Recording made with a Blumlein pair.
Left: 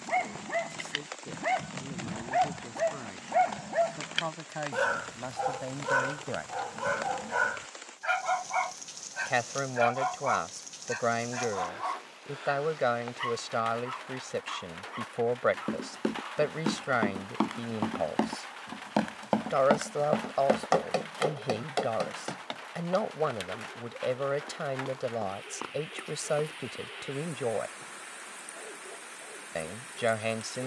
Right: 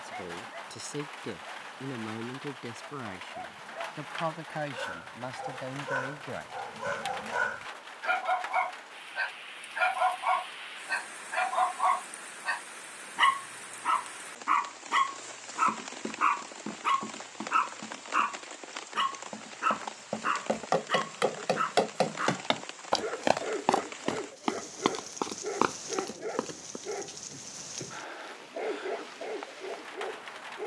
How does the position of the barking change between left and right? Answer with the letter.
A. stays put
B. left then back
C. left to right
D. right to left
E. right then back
C.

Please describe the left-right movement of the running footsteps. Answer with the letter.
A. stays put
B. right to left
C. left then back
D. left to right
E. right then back
D.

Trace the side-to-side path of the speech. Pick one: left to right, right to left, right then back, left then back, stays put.
right to left.